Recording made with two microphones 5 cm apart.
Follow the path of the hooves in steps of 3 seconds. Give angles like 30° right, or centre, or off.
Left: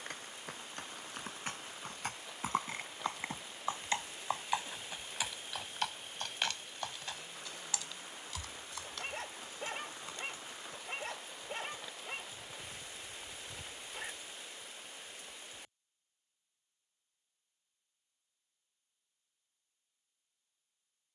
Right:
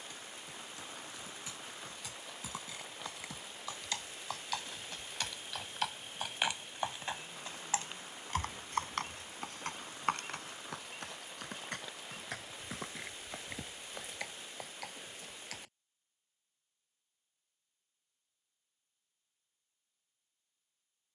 50° left, 20° left, 30° right, 60° right, 70° right, 80° right, off.